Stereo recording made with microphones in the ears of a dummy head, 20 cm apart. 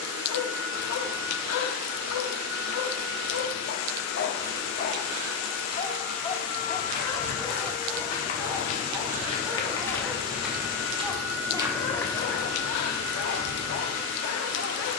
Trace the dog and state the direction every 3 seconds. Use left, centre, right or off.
left, left, centre, centre, left.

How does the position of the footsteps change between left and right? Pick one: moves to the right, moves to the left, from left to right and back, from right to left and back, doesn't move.
from left to right and back.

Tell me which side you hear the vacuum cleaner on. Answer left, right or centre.
left.